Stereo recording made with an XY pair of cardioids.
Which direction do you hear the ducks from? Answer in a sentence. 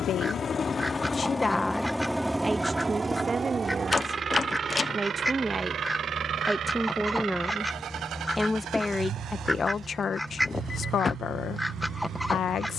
You can hear the ducks in the centre.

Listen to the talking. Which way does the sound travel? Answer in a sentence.
In this clip you hear the talking go right and come back.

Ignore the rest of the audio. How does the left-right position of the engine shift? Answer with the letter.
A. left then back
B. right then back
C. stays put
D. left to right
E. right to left
D.